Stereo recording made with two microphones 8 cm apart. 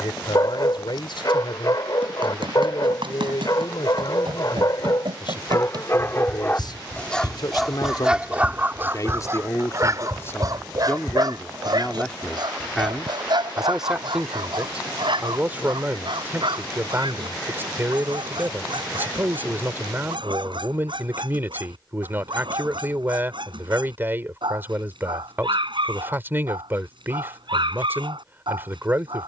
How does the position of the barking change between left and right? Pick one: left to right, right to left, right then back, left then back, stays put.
left to right.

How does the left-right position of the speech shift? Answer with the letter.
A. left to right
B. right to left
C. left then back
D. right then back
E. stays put
A.